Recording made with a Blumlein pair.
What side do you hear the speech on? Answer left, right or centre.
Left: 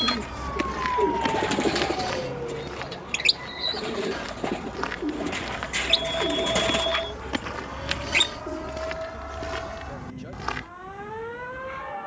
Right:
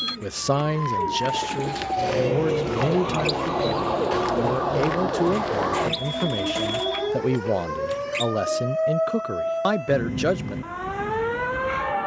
right.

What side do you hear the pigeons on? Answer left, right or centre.
left.